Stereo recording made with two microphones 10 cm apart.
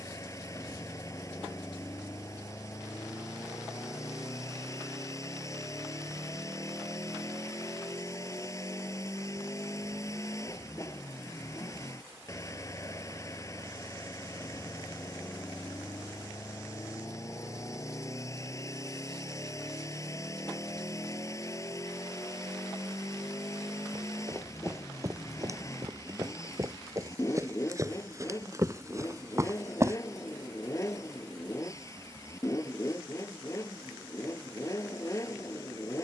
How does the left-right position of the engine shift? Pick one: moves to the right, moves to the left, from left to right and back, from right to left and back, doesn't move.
doesn't move.